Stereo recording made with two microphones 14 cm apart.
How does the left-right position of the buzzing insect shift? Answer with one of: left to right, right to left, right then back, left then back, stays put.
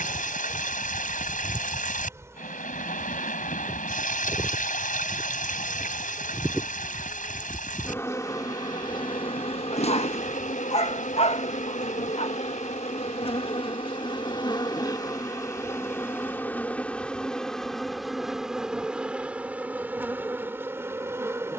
left then back.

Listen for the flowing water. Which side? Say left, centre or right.
left.